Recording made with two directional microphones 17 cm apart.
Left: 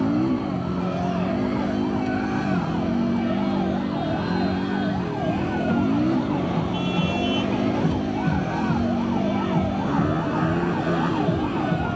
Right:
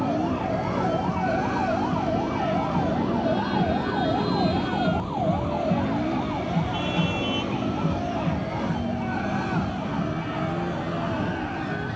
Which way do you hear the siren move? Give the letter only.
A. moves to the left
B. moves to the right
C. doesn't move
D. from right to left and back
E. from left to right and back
A.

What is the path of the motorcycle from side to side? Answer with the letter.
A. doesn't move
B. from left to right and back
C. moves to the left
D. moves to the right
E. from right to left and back
A.